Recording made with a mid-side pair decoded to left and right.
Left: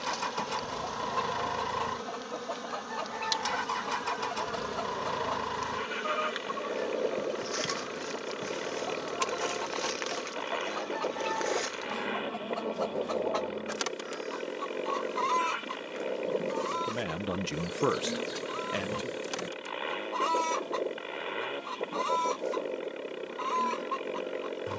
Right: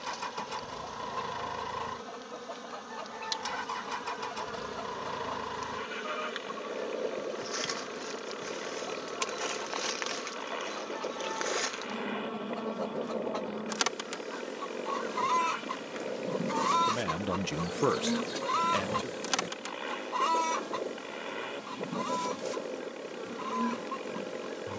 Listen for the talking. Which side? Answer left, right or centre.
centre.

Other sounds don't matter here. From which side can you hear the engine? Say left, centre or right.
left.